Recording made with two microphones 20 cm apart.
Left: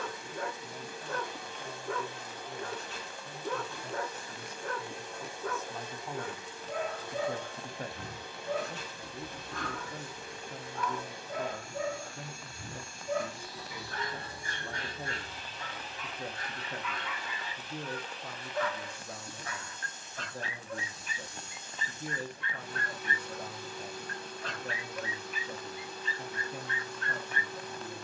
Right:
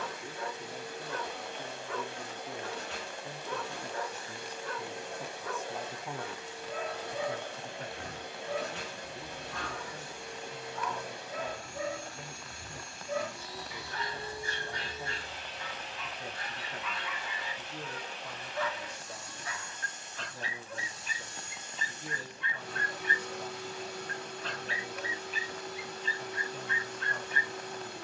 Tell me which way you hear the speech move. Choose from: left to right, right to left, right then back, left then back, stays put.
right to left.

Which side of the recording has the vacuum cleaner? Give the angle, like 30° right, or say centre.
70° right.